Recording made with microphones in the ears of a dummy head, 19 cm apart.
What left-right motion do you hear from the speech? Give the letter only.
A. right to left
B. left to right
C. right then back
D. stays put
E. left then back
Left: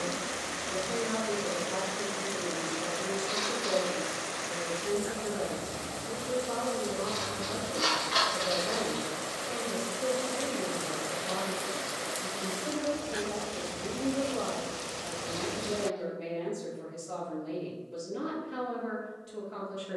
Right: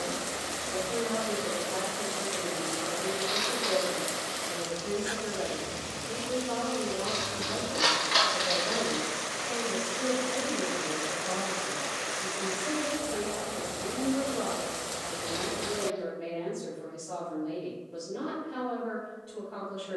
C.